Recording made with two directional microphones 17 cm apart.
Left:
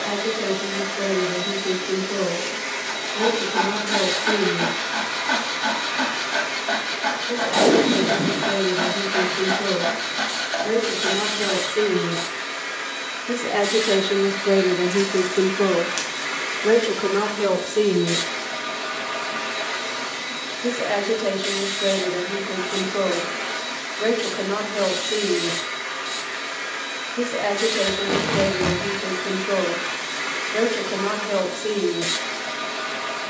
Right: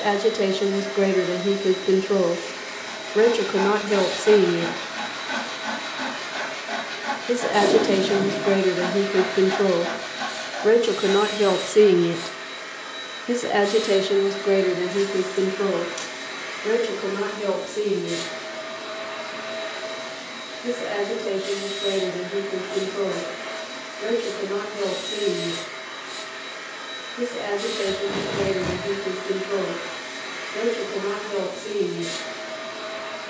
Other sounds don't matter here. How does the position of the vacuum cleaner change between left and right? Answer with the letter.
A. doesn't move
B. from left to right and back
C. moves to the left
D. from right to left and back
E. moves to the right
A.